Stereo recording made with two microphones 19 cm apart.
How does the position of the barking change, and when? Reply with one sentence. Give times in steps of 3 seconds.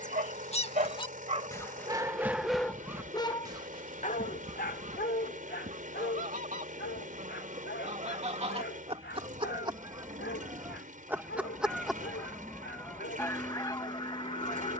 You can hear the barking on the right from 0 s and on the left from 3 s.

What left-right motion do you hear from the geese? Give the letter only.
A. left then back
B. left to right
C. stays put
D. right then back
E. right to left
D.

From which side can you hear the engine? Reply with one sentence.
You can hear the engine on the right.